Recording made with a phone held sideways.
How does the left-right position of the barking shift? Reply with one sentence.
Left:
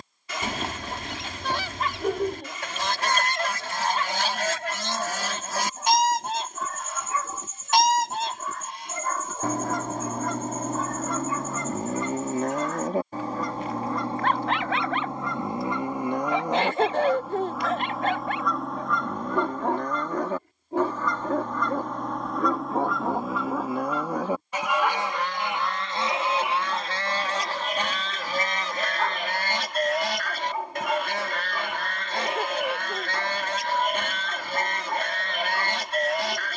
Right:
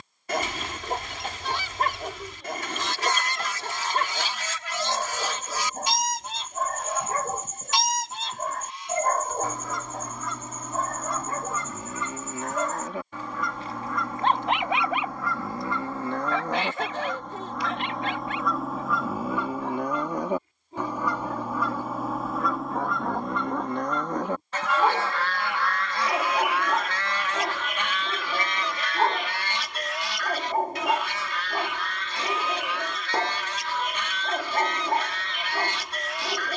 In this clip you hear the barking move from right to left and back again.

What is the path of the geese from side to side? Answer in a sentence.
You can hear the geese move from left to right and back again.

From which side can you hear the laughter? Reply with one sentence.
You can hear the laughter on the left.